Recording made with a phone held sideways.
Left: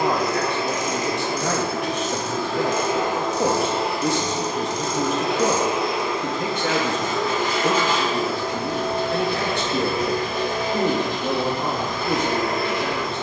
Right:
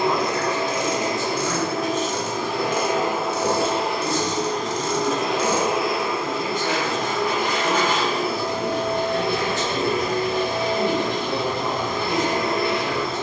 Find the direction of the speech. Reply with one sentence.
You can hear the speech on the left.